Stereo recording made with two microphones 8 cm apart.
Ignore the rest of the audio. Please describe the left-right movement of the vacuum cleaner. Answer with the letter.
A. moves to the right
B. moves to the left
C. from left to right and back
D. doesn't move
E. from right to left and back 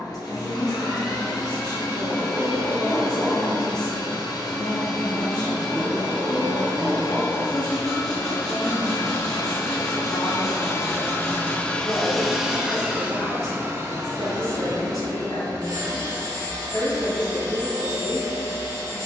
A.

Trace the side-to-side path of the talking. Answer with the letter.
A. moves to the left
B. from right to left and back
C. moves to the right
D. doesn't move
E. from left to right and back
D.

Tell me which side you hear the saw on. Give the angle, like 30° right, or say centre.
10° left.